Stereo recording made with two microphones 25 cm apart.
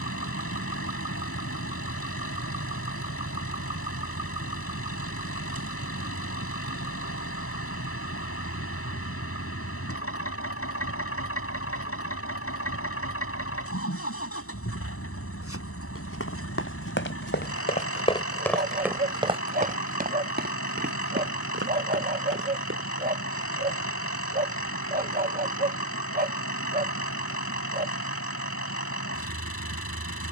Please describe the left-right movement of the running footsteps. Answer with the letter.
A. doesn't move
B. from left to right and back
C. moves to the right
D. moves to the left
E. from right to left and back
C.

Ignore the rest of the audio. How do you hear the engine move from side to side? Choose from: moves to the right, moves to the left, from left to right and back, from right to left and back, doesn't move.
doesn't move.